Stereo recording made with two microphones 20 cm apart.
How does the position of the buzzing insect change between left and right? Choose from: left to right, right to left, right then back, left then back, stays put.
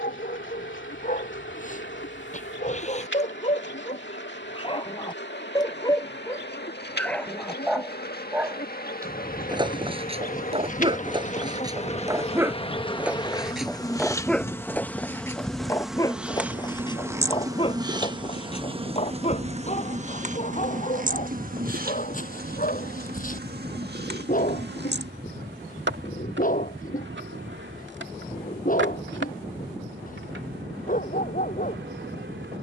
left to right.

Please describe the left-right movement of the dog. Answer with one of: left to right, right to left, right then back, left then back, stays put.
right then back.